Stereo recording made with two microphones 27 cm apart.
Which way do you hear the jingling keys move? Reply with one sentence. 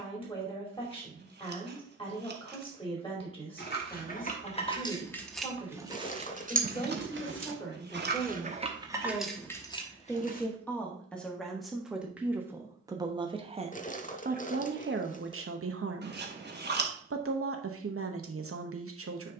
In this clip you hear the jingling keys move from left to right and back again.